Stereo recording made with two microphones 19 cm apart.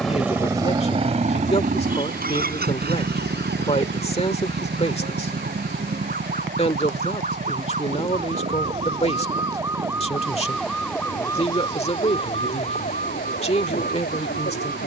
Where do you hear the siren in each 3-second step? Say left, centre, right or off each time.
right, right, right, centre, left.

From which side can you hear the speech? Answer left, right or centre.
left.